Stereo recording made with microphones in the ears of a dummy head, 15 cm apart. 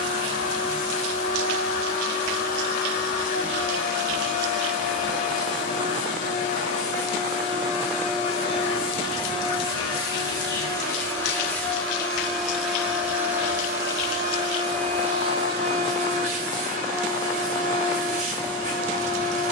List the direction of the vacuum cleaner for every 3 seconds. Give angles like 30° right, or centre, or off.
50° left, 50° left, 40° left, 20° left, 10° right, 40° right, 50° right.